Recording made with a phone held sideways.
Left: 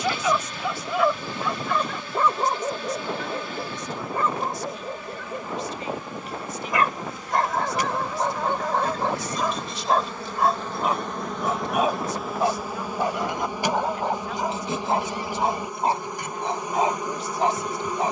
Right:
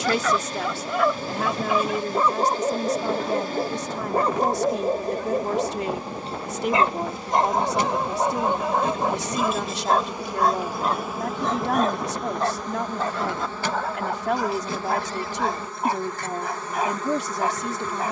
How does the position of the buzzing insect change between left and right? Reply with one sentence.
In this clip you hear the buzzing insect move to the left.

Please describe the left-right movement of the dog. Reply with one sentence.
In this clip you hear the dog go right and come back.